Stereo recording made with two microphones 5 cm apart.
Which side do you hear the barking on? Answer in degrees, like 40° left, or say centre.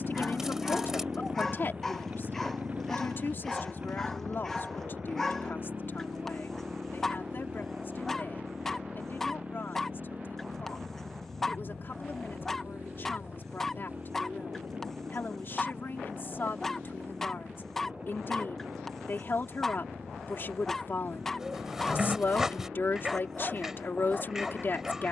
10° left.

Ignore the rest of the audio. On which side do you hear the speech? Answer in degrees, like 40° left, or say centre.
50° left.